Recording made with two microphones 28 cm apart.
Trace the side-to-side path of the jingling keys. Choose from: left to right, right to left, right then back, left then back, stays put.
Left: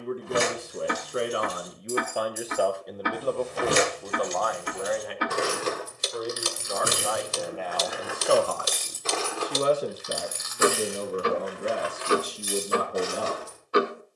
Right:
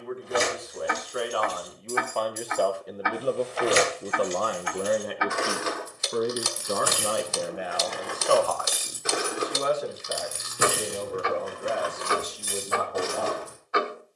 left to right.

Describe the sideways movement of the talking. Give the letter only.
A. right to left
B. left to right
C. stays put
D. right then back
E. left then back
D.